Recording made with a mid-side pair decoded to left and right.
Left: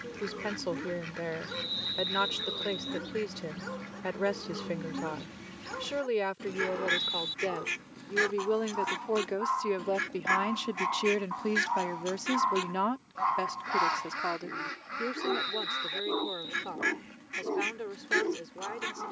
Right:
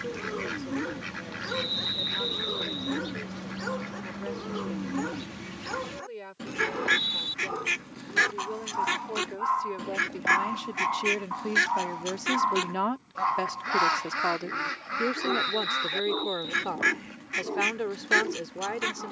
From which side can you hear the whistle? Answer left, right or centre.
right.